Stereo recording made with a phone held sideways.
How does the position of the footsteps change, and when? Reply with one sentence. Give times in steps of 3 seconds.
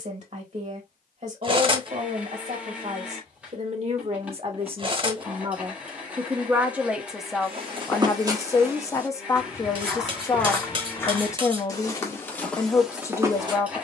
In this clip you hear the footsteps not at all from 0 s, on the right from 6 s and in the centre from 9 s.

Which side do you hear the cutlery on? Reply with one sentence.
In this clip you hear the cutlery on the right.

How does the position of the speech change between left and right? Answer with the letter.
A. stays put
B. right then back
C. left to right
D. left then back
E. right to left
E.